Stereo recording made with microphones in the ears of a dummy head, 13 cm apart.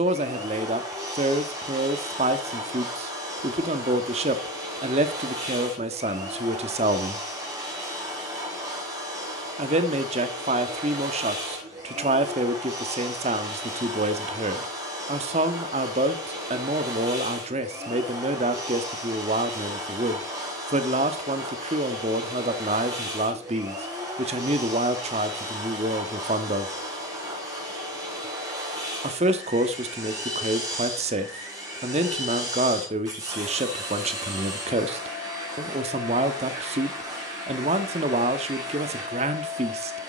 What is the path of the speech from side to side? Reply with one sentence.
In this clip you hear the speech stay in one place.